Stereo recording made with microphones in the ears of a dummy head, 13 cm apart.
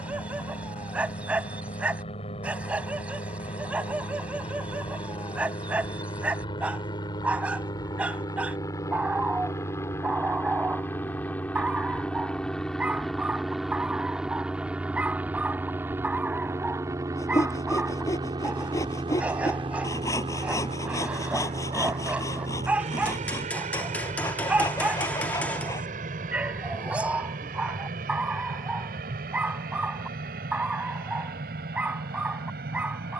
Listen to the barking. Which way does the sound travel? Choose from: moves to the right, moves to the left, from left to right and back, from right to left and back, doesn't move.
doesn't move.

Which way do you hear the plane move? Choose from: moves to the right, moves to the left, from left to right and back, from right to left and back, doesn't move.
moves to the right.